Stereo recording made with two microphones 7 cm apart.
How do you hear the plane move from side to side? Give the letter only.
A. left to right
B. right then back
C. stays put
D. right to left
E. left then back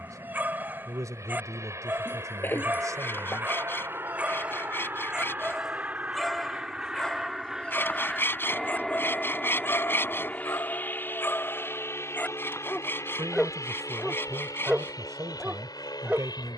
D.